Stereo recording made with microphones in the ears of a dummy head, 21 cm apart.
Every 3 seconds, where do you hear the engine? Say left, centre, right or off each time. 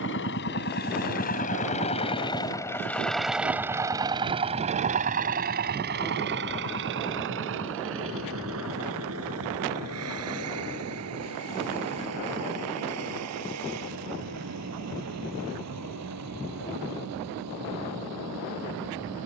left, right, right, right, right, right, right.